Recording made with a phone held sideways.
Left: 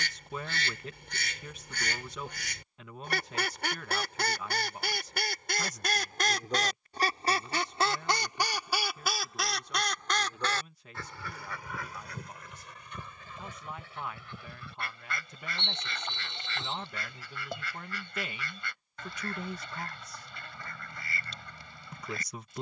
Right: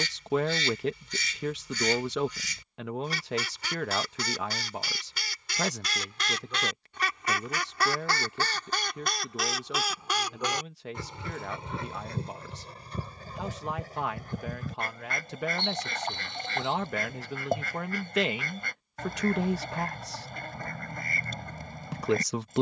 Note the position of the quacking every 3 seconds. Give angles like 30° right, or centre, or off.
60° left, 60° left, 30° left, 10° right, 40° right, 40° right, 40° right, 40° right.